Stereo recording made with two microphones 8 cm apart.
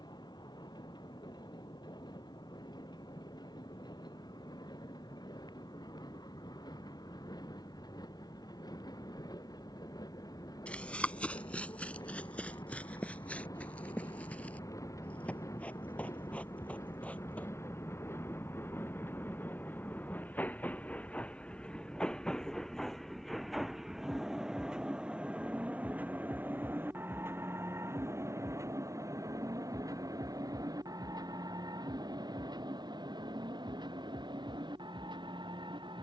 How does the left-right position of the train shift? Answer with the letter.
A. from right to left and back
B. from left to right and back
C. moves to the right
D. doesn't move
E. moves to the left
C.